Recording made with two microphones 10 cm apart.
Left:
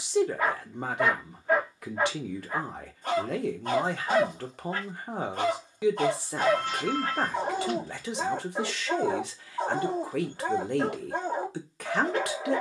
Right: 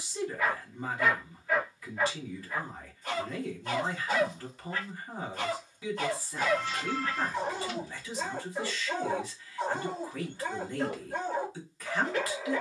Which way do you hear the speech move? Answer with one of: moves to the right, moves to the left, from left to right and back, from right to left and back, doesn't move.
doesn't move.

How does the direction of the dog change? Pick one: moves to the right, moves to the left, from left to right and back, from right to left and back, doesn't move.
doesn't move.